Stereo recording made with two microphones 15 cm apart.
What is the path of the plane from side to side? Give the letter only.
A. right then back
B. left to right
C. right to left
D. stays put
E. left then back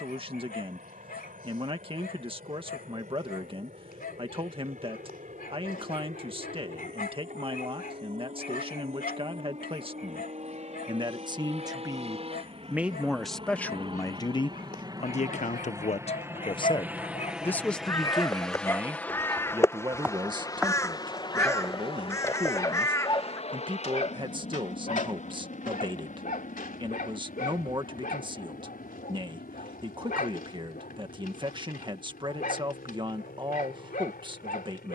C.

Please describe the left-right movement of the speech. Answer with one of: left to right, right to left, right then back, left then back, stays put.
left then back.